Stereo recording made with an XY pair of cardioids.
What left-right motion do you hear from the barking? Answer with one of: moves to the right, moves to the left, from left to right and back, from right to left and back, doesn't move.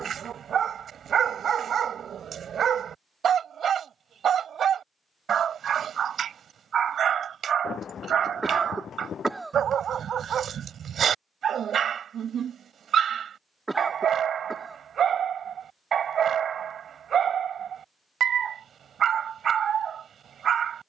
doesn't move.